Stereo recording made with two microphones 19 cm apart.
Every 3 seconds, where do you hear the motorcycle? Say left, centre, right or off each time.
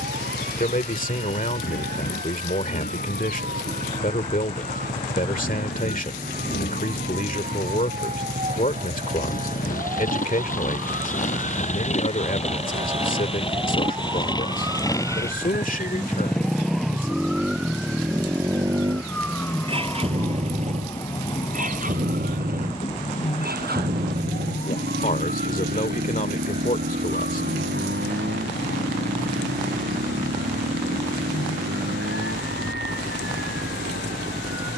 left, left, left, left, left, centre, right, right, right, right, right, right.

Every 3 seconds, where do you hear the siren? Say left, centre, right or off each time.
right, right, right, right, right, centre, centre, left, left, left, left, left.